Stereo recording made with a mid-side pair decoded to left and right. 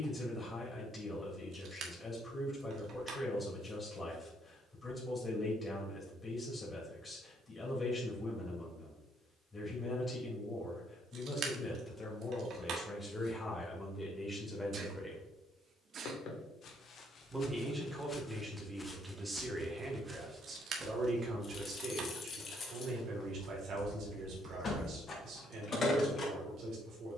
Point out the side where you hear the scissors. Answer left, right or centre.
right.